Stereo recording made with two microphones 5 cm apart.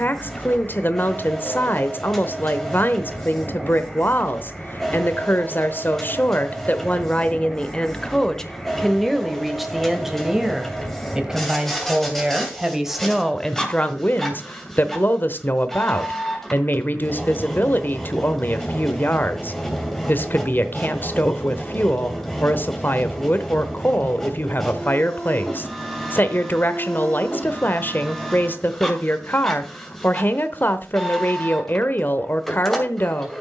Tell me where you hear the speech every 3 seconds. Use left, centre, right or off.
left, left, left, centre, centre, left, left, left, left, left, left.